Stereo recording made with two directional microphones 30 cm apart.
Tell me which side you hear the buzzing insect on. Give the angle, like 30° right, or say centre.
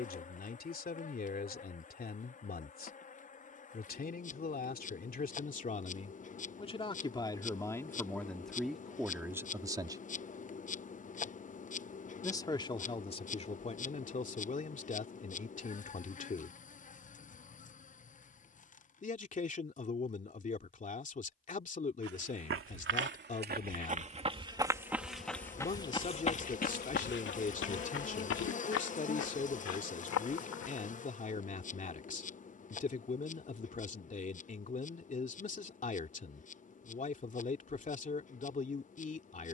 30° left.